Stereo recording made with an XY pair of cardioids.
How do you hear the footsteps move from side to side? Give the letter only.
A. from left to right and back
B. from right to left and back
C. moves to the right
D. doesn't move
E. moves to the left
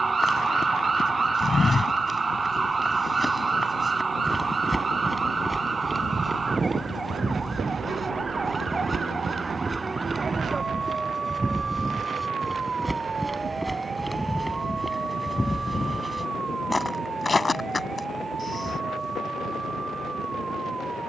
A.